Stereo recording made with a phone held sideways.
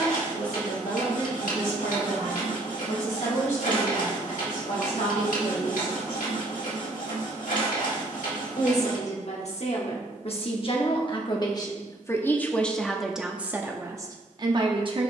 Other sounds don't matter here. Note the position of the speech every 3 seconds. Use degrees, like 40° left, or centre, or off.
80° left, 70° left, 60° left, 40° left, 10° right.